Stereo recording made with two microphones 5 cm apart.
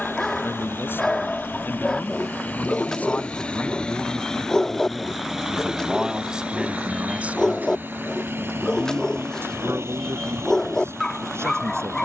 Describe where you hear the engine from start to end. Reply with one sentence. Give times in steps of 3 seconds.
You can hear the engine on the left from 0 s, in the centre from 3 s and on the right from 6 s.